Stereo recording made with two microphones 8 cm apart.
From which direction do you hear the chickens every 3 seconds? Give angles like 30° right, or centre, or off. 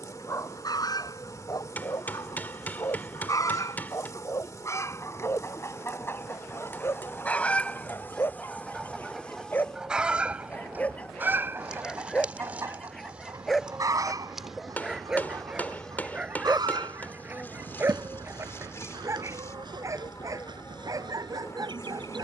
50° left, 40° left, 20° left, 20° right, 40° right, 60° right, 70° right, 70° right.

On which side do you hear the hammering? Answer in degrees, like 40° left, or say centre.
20° left.